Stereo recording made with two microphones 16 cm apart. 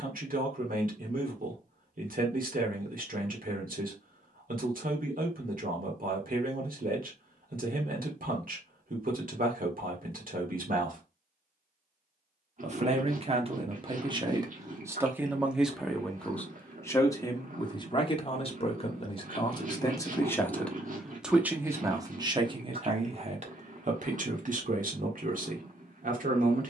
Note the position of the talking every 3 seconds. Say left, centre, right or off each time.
right, right, right, right, right, centre, left, right, right.